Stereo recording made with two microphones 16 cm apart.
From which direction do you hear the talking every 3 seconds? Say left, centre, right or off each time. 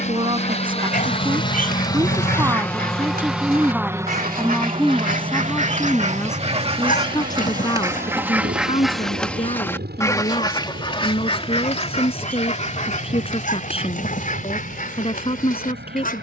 right, centre, left, left, left, left.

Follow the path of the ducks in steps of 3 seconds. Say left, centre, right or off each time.
right, right, right, left, left, left.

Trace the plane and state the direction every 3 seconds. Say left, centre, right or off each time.
left, right, right, right, right, right.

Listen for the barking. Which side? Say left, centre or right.
left.